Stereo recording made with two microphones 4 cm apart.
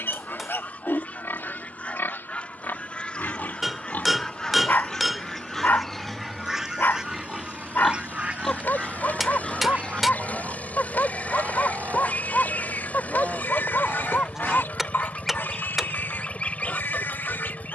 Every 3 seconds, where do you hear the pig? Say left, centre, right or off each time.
left, left, centre, left, left, left.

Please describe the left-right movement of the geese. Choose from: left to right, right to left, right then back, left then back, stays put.
right then back.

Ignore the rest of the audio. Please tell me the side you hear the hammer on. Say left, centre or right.
centre.